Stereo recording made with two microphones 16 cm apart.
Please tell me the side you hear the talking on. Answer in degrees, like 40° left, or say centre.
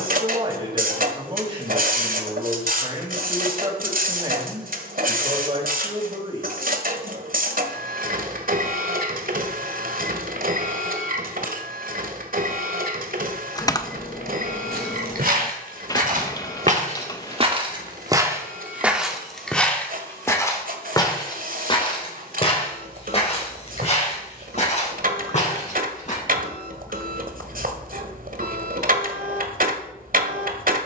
30° right.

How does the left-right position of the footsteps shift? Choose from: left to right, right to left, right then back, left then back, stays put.
right to left.